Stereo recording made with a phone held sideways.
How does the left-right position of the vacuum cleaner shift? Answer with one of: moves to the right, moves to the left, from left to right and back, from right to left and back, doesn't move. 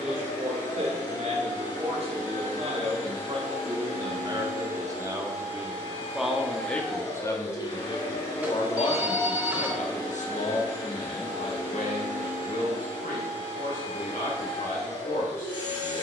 doesn't move.